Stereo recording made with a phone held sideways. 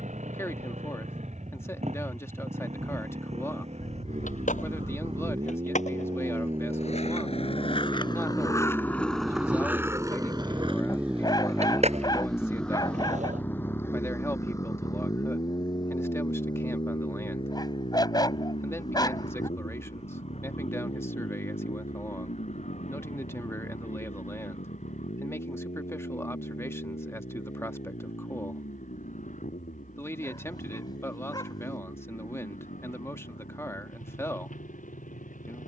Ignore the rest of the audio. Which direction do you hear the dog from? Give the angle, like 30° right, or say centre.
30° left.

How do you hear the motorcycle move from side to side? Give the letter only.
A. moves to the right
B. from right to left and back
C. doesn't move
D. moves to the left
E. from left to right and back
D.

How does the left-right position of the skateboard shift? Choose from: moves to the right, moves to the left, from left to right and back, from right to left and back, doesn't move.
moves to the right.